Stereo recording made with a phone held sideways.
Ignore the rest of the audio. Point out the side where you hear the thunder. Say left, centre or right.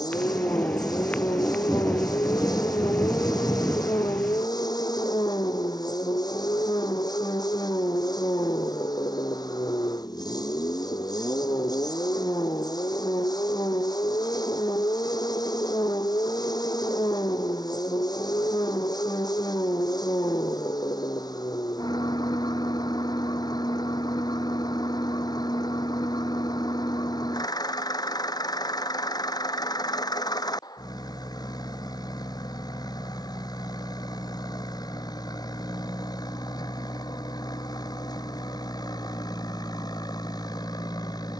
centre.